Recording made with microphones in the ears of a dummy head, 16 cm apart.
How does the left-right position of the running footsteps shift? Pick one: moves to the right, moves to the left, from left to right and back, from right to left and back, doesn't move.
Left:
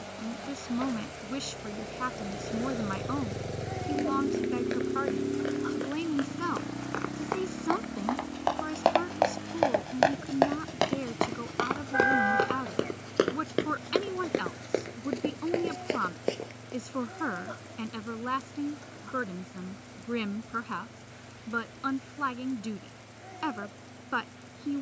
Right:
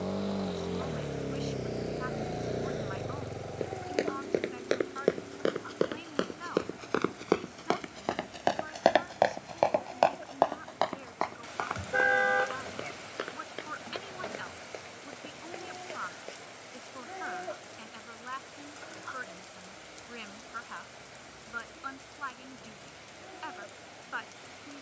moves to the left.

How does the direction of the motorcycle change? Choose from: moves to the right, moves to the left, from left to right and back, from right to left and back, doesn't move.
moves to the left.